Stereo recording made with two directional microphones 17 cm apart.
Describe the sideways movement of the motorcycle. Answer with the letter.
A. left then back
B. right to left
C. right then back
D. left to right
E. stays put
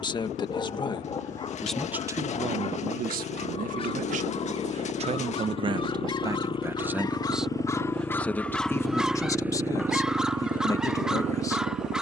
D.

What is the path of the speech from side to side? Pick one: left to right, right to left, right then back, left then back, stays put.
right then back.